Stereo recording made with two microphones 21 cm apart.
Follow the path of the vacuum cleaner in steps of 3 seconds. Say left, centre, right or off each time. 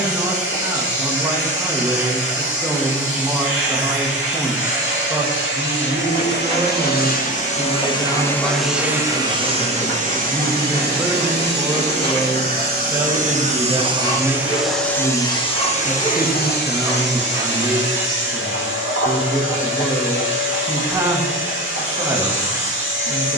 left, left, left, right, right, left, left, left.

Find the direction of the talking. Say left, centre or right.
centre.